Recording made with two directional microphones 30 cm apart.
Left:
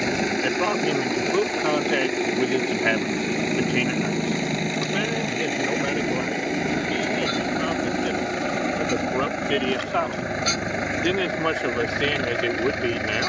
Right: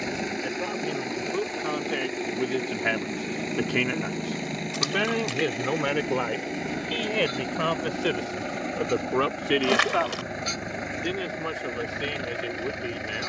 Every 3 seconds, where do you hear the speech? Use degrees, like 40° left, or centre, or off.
40° left, 10° right, 40° right, 20° left, 60° left.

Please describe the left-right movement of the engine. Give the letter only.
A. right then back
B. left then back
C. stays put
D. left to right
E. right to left
C.